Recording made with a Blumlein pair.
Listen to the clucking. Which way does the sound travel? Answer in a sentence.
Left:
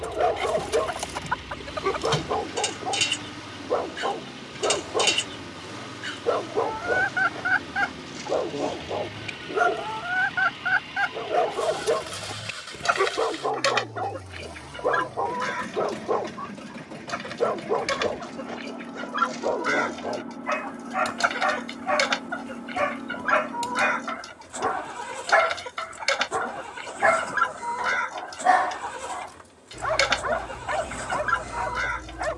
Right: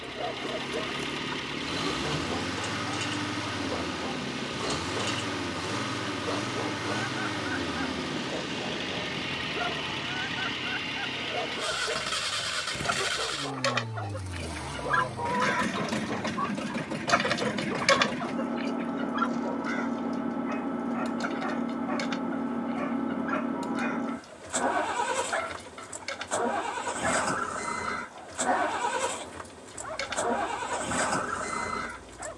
You can hear the clucking move from left to right and back again.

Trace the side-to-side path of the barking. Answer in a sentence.
You can hear the barking stay in one place.